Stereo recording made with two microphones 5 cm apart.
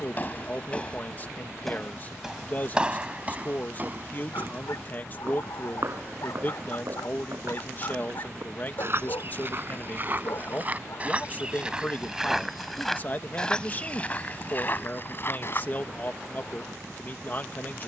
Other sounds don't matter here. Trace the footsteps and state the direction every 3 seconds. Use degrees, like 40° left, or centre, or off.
10° left, 40° right, 60° right, 30° right, 20° left, 40° left.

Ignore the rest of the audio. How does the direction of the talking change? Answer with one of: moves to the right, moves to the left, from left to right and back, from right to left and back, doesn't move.
doesn't move.